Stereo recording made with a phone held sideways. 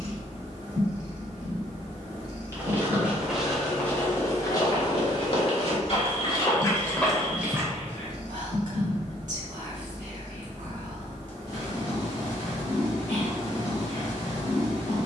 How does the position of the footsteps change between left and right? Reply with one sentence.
In this clip you hear the footsteps go left and come back.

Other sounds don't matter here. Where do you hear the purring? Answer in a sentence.
In this clip you hear the purring on the right.